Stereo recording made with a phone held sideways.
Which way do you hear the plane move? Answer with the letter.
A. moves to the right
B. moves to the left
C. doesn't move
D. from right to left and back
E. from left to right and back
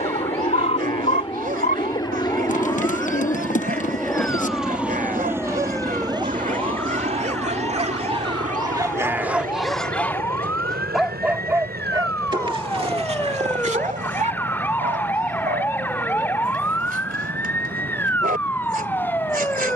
A.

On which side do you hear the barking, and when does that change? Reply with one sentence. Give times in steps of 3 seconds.
You can hear the barking on the right from 0 s, in the centre from 9 s and on the right from 12 s.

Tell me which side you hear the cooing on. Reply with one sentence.
In this clip you hear the cooing on the left.